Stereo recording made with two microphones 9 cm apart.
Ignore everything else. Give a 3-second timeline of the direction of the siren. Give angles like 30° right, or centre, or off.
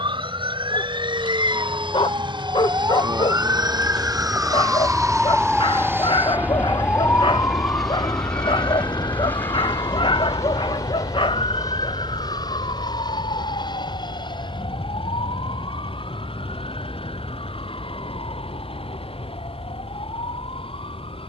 50° right, 20° right, 30° left, 60° left, 70° left, 80° left, 80° left.